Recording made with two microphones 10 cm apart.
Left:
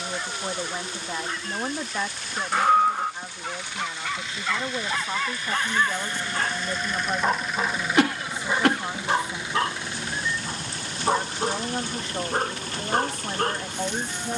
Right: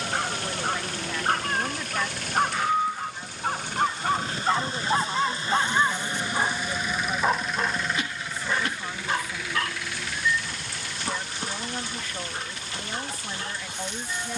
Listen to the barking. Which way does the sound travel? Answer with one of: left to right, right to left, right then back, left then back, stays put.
right to left.